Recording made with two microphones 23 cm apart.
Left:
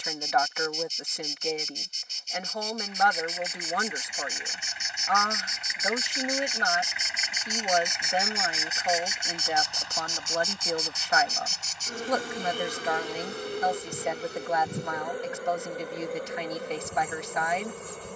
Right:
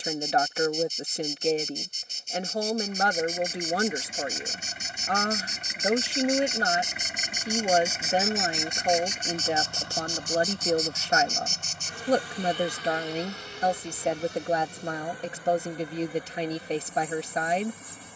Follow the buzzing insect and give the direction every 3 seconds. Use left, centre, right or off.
right, right, centre, left, left, left.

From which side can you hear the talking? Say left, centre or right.
right.